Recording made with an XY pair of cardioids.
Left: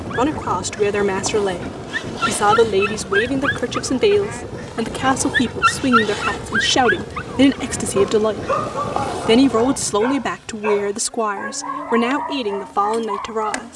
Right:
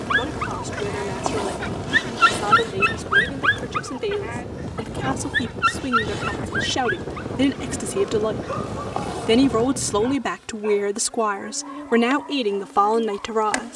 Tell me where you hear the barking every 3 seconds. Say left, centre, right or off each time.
right, centre, left, left, left.